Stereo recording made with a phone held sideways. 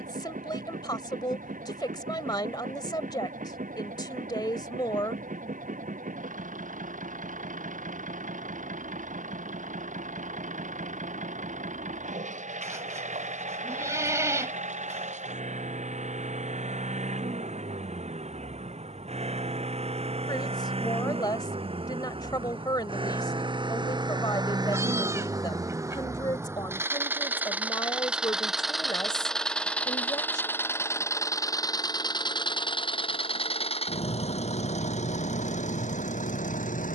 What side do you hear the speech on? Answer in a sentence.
In this clip you hear the speech on the left.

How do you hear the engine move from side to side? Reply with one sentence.
You can hear the engine move from right to left.